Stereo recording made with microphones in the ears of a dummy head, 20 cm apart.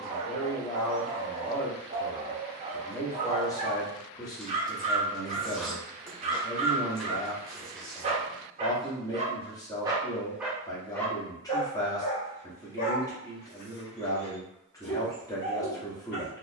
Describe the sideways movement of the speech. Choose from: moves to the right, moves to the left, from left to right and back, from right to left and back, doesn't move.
doesn't move.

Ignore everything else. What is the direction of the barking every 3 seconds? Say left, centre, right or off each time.
right, right, right, centre, left, left.